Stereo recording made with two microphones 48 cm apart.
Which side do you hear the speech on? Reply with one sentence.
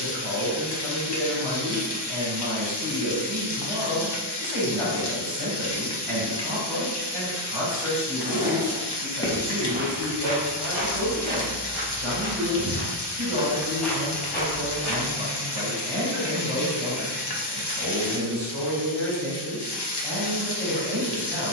You can hear the speech on the right.